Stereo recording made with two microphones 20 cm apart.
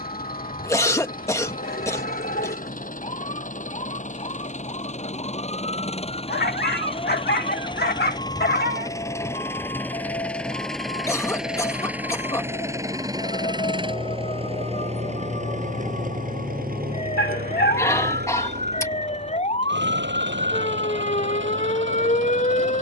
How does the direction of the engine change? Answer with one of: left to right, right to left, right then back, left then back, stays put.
left to right.